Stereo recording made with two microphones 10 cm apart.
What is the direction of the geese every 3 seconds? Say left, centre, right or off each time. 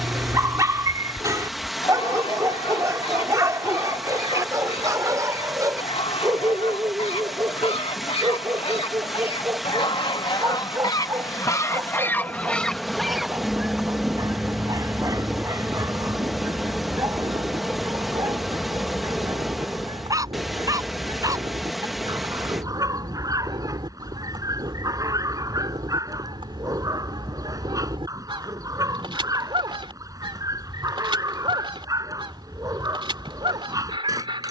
left, left, left, left, centre, right, right, right, right, right, right, right.